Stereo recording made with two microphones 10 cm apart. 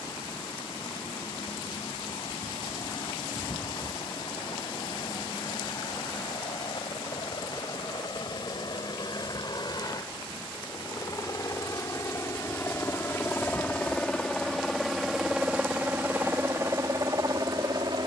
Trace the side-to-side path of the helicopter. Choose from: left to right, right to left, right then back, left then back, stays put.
left to right.